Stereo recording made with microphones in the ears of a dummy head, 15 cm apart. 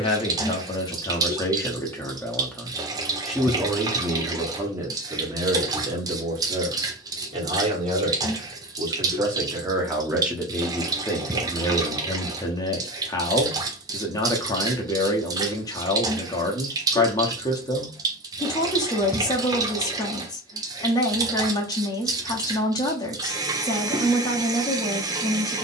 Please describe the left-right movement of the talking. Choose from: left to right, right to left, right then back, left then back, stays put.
right then back.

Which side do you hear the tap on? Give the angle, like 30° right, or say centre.
20° right.